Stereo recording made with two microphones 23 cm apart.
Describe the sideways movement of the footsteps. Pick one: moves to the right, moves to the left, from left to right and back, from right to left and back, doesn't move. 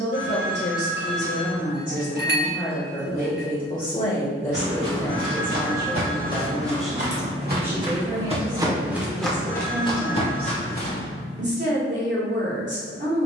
moves to the left.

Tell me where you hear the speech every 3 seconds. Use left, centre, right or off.
left, left, centre, right, right.